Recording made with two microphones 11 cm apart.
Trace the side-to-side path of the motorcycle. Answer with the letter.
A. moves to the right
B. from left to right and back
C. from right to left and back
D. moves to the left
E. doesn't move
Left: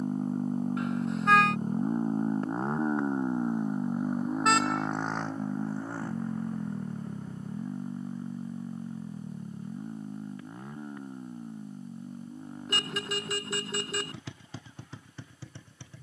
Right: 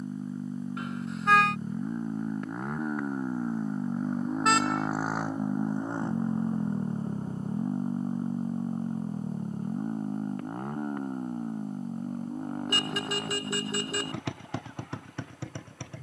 A.